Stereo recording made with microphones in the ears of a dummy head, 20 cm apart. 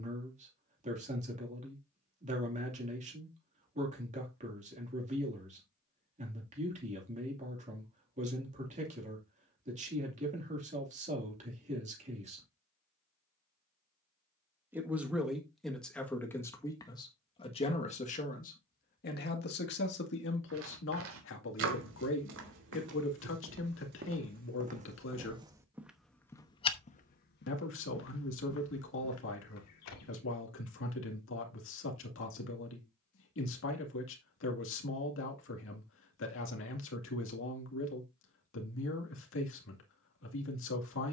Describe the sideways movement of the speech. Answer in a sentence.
In this clip you hear the speech move from right to left.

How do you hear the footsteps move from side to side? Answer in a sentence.
In this clip you hear the footsteps move to the left.